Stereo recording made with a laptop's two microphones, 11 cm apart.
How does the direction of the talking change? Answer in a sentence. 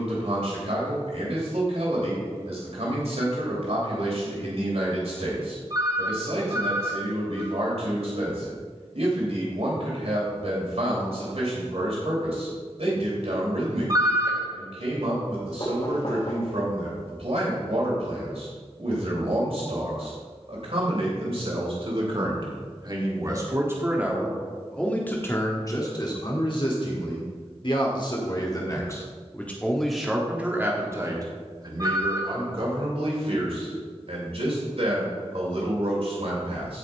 In this clip you hear the talking go left and come back.